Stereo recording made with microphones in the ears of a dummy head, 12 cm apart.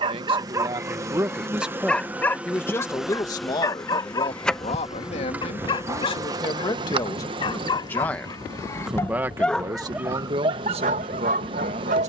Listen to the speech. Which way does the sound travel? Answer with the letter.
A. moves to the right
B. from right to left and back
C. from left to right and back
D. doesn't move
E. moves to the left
B.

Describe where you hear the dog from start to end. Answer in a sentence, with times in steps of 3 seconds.
In this clip you hear the dog in the centre from 0 s, on the left from 3 s and on the right from 9 s.